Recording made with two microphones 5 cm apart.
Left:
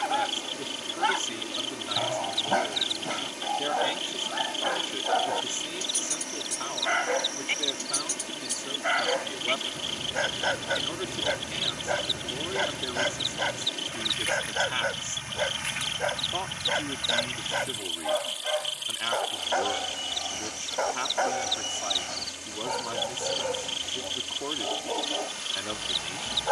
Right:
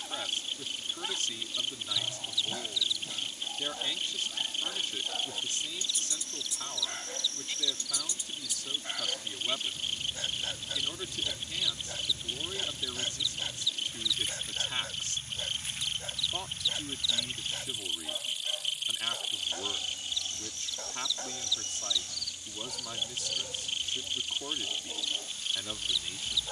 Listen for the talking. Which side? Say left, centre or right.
left.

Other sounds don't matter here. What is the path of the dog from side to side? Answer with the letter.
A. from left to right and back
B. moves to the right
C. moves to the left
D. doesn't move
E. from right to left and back
D.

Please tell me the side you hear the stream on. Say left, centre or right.
left.